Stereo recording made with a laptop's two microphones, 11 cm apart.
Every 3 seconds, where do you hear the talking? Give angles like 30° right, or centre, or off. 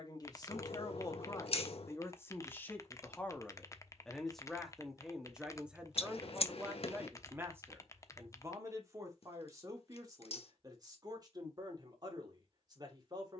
30° left, centre, 20° right, 40° right, 40° right.